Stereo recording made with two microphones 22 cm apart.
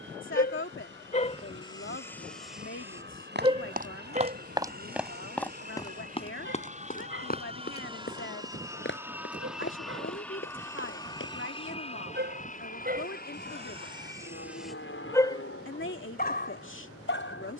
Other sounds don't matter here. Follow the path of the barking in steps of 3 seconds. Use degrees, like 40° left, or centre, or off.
10° left, 40° right, 60° right, 60° right, 30° right, 40° left.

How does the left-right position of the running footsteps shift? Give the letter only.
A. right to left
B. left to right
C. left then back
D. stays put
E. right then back
A.